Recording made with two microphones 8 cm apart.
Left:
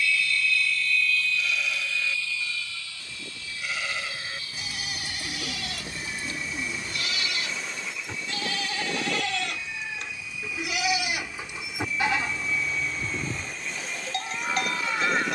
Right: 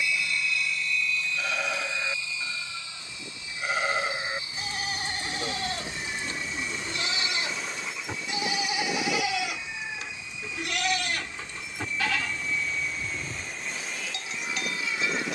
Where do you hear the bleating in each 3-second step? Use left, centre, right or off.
right, right, right, centre, left.